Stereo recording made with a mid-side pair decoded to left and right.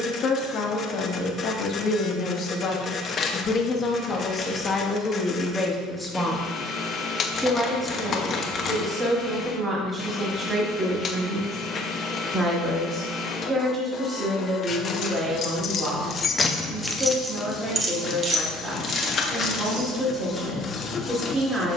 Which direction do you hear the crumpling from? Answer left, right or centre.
left.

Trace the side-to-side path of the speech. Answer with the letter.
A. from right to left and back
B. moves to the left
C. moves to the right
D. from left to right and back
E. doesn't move
C.